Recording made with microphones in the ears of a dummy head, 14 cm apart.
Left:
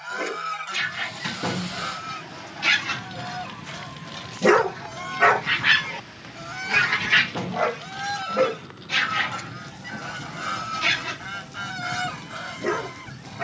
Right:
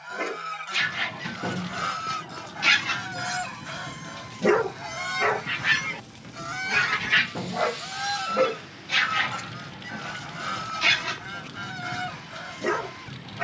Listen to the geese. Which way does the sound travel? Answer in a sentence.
You can hear the geese move from left to right and back again.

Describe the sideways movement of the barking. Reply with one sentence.
You can hear the barking go left and come back.